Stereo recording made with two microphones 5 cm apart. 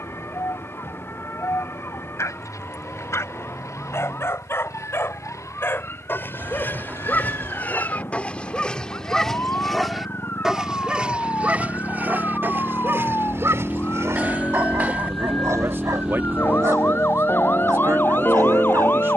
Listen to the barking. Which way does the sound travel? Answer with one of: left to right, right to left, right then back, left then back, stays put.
left to right.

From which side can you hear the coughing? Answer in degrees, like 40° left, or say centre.
30° right.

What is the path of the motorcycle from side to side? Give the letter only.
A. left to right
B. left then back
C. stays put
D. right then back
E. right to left
A.